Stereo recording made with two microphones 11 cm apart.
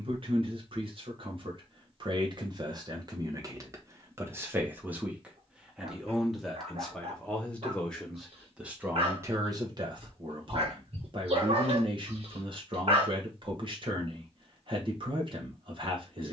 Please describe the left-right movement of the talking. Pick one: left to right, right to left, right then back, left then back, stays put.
left then back.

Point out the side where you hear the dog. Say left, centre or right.
right.